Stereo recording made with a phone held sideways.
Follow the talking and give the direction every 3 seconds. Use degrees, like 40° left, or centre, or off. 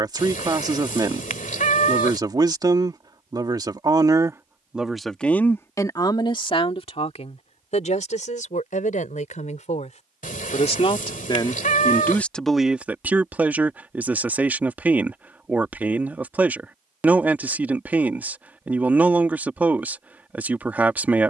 30° right, 10° right, 50° left, 40° left, 10° right, 10° right, 10° right.